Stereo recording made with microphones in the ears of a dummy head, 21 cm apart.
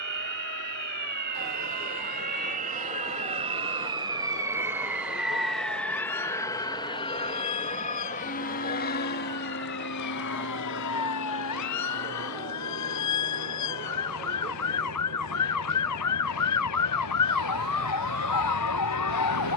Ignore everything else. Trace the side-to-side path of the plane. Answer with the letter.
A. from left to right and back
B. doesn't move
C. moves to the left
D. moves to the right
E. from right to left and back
C.